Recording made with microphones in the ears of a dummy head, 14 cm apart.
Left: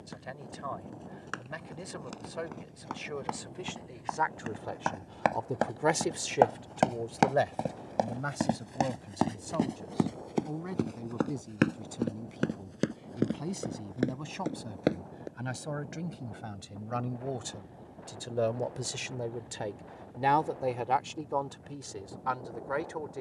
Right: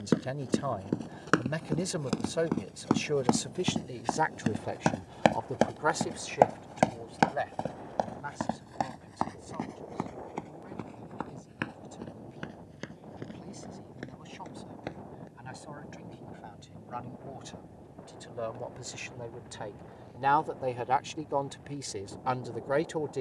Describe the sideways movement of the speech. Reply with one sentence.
You can hear the speech move from right to left and back again.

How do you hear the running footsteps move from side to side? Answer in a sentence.
You can hear the running footsteps move to the left.